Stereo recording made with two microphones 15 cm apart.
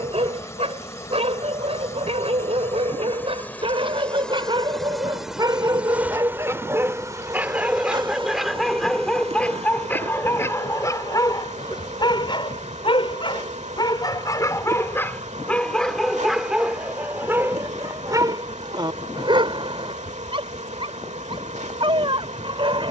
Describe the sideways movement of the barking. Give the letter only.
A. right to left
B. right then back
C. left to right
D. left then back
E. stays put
D.